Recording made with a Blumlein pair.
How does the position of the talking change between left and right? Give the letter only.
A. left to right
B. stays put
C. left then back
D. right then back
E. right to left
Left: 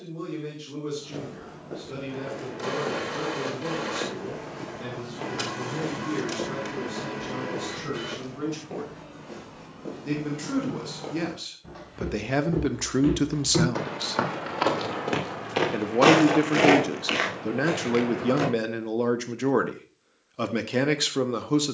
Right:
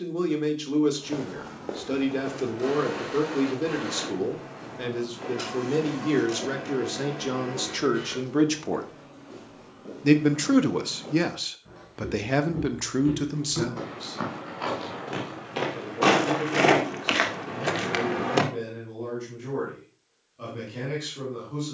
E.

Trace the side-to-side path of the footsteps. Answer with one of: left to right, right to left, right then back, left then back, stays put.
left then back.